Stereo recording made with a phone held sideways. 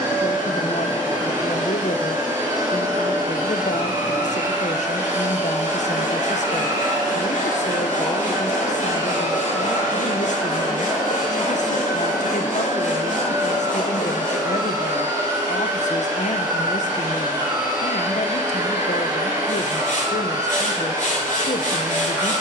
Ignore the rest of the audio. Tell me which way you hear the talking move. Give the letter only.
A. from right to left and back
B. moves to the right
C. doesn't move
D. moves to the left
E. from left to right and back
C.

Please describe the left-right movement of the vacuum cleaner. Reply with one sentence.
In this clip you hear the vacuum cleaner stay in one place.